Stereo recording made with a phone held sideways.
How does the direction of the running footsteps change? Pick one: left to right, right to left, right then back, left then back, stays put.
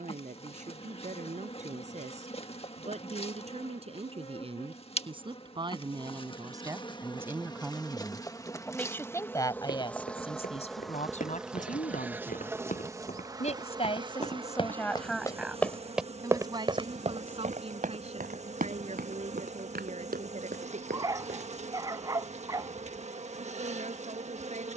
left to right.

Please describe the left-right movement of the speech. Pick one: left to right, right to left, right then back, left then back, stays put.
left then back.